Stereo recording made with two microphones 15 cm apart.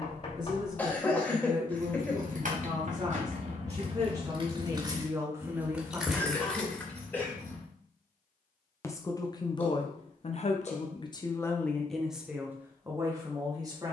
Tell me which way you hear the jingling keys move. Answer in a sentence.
You can hear the jingling keys move to the left.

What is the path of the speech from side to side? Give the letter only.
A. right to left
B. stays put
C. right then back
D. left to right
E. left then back
E.